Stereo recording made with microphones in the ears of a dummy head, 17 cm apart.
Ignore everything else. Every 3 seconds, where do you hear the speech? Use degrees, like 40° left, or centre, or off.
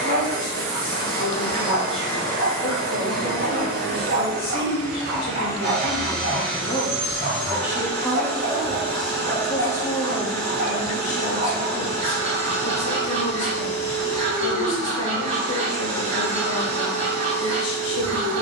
70° left, 70° left, 10° left, 30° left, 60° left, 70° left.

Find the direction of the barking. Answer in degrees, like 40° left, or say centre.
30° right.